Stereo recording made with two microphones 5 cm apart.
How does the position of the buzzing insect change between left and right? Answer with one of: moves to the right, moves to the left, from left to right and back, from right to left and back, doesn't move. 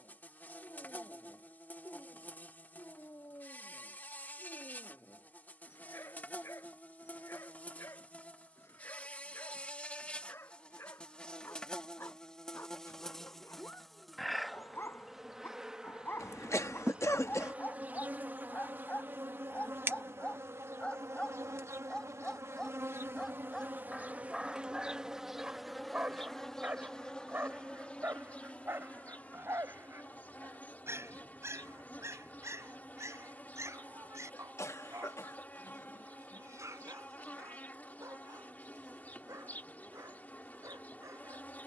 from left to right and back.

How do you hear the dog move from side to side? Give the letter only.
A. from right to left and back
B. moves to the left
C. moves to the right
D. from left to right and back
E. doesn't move
C.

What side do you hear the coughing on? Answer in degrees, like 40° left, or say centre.
70° left.